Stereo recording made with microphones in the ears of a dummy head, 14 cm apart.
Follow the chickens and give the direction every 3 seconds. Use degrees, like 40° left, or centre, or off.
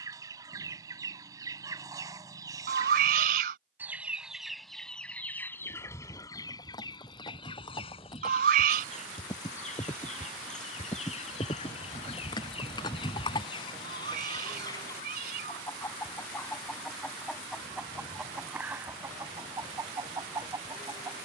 20° right, centre, 30° left, 40° left, 30° left, 10° left, 20° right.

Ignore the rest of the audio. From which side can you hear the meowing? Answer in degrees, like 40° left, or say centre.
60° right.